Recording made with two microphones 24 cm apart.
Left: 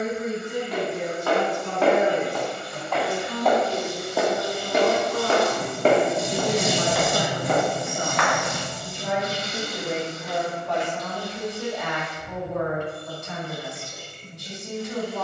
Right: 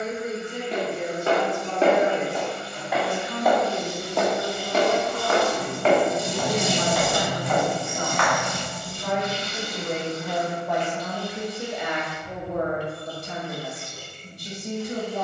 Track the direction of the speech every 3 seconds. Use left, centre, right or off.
left, left, left, centre, right.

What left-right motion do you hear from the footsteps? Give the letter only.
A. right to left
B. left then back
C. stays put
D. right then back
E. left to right
A.